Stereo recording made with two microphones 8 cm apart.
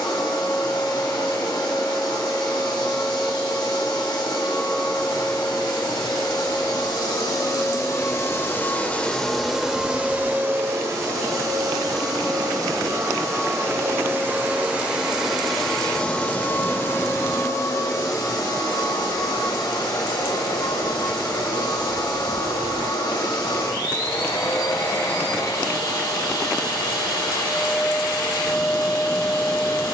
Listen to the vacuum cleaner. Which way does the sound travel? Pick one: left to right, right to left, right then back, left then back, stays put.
right then back.